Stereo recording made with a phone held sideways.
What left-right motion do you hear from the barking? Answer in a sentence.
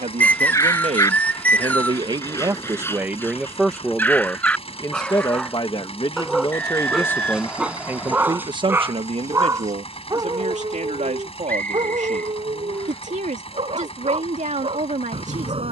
In this clip you hear the barking travel towards the right.